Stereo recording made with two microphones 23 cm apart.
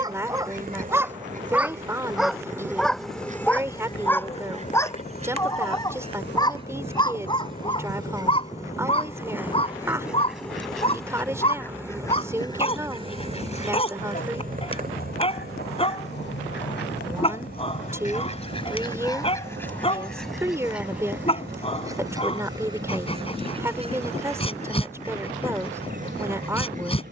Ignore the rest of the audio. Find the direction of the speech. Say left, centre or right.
centre.